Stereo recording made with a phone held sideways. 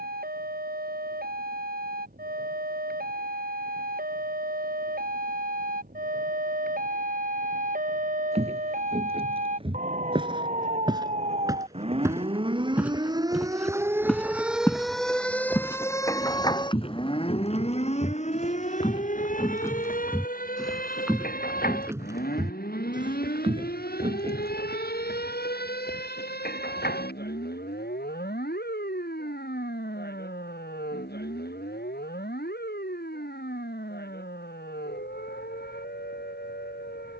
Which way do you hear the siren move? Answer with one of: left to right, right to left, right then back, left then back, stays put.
right to left.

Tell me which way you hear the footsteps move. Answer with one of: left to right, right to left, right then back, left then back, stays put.
left then back.